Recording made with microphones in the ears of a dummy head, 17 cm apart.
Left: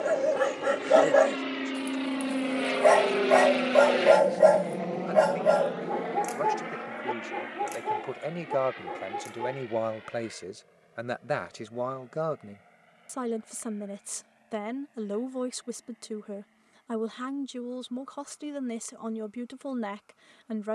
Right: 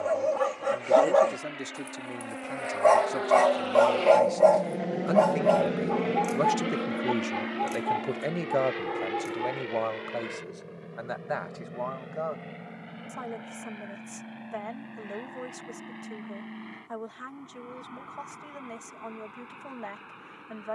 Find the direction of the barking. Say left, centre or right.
centre.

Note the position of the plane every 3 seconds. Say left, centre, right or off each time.
left, centre, right, right, right, right, right.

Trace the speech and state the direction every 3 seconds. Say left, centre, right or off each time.
right, right, right, left, left, left, left.